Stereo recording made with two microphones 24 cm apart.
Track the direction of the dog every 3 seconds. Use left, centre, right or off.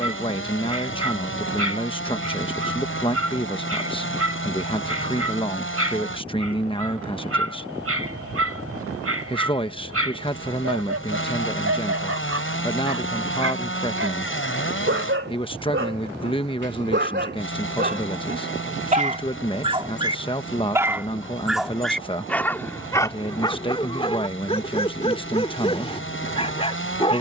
right, right, right, right, right, right, right, centre, left.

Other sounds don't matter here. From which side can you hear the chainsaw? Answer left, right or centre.
left.